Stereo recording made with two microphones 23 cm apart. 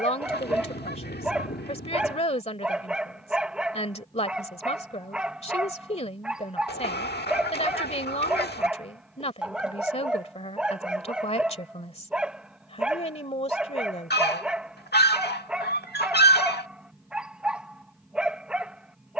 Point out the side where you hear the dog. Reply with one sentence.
In this clip you hear the dog in the centre.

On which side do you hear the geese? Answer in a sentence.
You can hear the geese on the left.